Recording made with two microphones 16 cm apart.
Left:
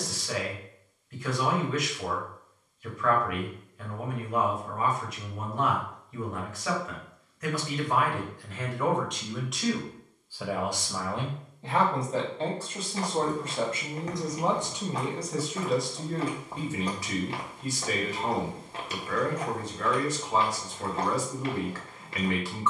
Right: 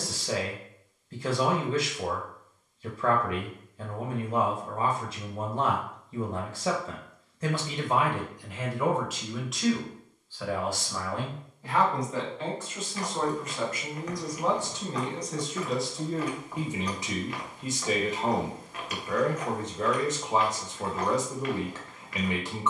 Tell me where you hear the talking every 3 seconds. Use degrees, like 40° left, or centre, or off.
30° right, 30° right, 20° right, 10° left, 30° left, 10° right, 20° right, 20° right.